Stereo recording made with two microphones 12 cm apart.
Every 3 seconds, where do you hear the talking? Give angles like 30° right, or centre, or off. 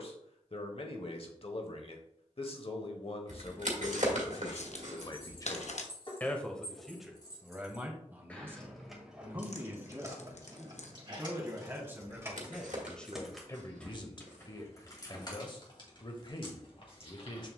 50° left, 40° left, 10° right, 20° right, 20° left, 40° left.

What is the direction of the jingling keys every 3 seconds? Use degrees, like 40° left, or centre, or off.
off, 50° left, 30° left, 30° right, centre, 40° left.